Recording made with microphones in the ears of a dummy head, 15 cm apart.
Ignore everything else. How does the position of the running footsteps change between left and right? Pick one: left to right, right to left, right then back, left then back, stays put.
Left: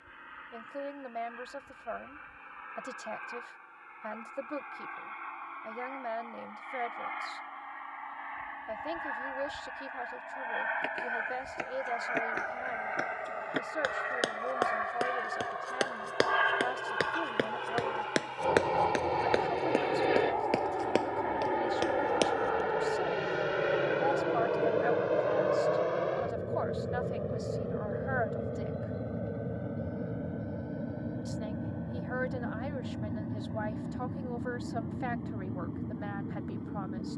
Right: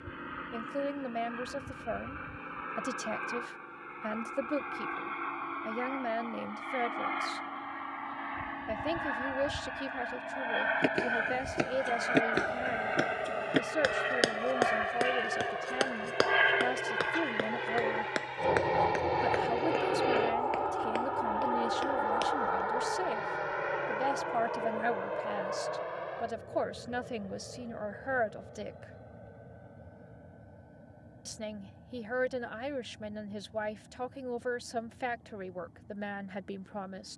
right to left.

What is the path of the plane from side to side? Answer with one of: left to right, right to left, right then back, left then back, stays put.
right to left.